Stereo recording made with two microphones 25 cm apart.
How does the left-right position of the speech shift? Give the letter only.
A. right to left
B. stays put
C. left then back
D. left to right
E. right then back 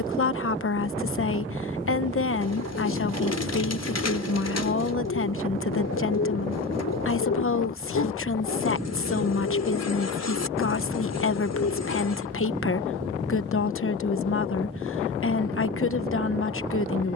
B.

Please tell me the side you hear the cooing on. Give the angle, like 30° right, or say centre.
80° left.